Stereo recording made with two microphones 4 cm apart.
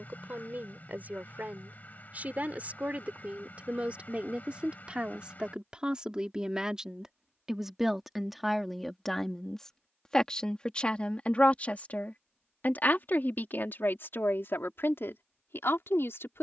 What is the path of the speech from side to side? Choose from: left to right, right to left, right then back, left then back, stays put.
right to left.